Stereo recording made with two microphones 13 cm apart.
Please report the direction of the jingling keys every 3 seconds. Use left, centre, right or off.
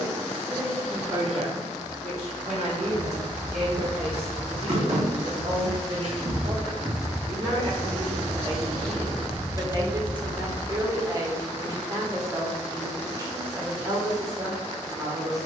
off, right, right, left, off.